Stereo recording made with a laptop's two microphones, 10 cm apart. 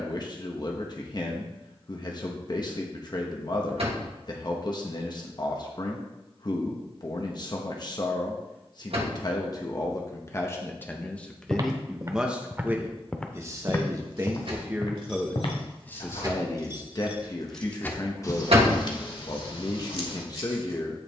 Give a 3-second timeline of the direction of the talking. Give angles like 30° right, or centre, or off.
40° left, 40° left, 40° left, 20° left, 20° right, 30° left, 40° left.